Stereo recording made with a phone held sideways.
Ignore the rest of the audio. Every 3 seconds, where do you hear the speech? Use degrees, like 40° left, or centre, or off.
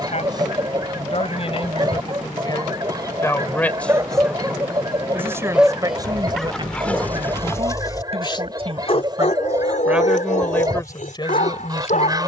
40° left, centre, 40° right, 10° left.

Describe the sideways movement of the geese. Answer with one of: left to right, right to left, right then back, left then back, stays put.
stays put.